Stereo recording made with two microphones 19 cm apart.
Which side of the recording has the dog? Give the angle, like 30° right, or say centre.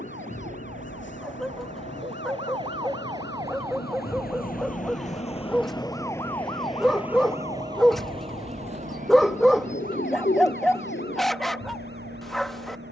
centre.